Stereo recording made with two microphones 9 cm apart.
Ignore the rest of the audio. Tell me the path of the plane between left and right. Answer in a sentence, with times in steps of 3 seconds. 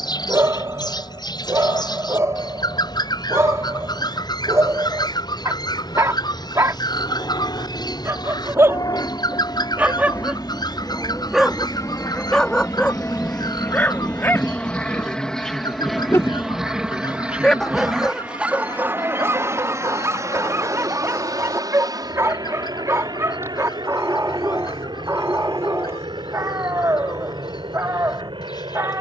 In this clip you hear the plane on the left from 0 s, in the centre from 15 s and on the right from 18 s.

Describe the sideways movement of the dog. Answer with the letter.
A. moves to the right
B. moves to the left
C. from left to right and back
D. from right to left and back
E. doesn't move
D.